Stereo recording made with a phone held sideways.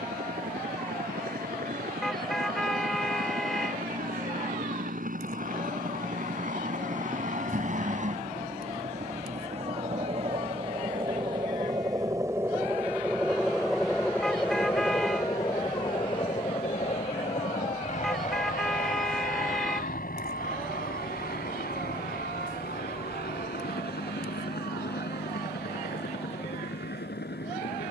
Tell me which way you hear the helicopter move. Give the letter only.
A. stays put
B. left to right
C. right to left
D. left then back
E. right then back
C.